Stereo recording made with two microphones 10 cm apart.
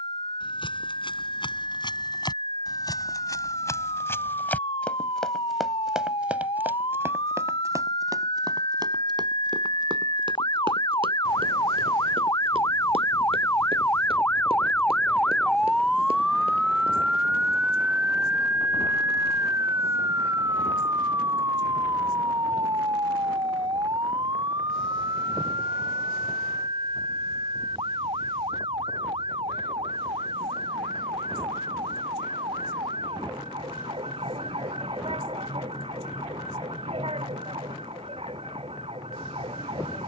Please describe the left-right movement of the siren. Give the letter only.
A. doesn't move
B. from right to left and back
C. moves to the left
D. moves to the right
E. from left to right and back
D.